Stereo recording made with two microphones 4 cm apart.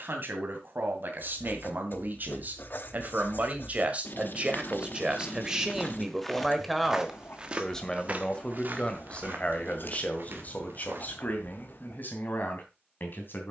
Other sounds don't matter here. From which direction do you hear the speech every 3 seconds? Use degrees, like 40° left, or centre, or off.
60° right, 30° right, 10° left, 40° left, 50° left.